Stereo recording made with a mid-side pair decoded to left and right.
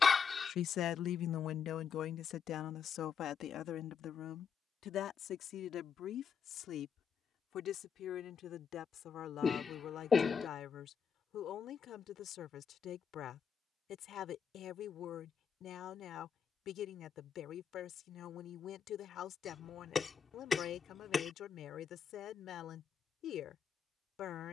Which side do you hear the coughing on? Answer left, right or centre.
left.